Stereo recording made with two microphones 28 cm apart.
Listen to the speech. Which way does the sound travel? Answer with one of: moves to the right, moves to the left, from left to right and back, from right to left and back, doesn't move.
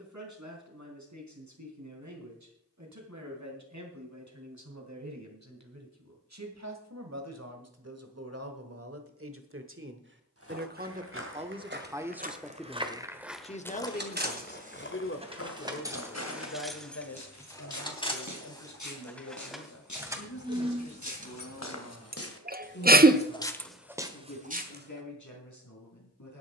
moves to the left.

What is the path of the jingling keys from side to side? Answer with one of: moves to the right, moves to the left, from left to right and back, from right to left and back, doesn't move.
from right to left and back.